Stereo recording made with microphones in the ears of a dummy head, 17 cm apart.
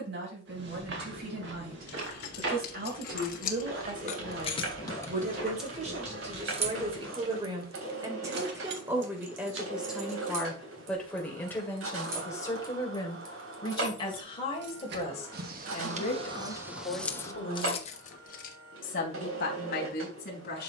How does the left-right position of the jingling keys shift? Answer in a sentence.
In this clip you hear the jingling keys move from left to right and back again.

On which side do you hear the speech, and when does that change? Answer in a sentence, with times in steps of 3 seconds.
You can hear the speech on the right from 0 s, in the centre from 9 s and on the left from 12 s.